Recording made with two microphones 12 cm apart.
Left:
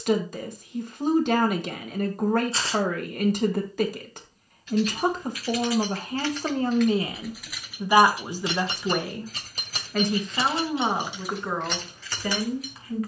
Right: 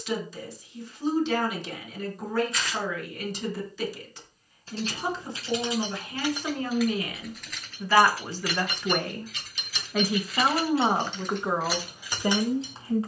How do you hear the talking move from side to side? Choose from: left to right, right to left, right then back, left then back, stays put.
left to right.